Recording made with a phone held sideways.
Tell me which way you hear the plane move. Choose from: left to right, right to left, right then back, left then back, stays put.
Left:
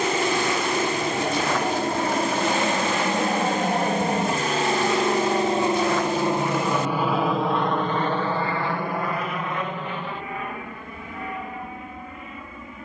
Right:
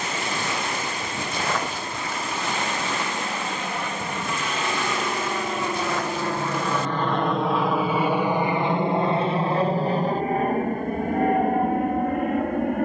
left to right.